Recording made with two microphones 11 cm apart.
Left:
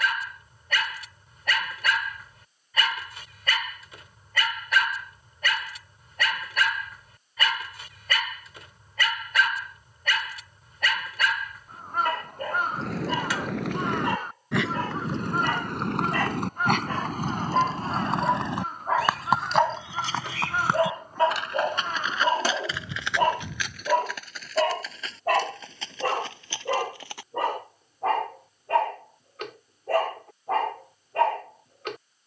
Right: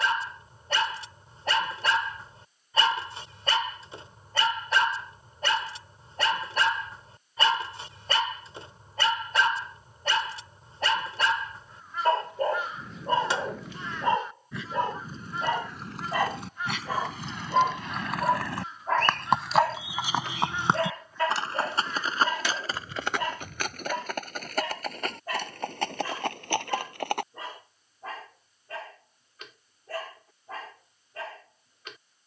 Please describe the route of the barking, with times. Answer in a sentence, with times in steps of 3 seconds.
In this clip you hear the barking on the right from 0 s, in the centre from 15 s and on the left from 21 s.